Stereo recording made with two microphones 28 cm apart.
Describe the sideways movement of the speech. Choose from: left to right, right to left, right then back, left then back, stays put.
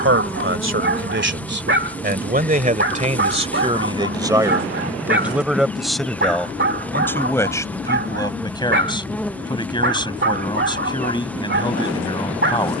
right to left.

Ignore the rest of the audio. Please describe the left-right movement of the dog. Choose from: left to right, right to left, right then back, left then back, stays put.
stays put.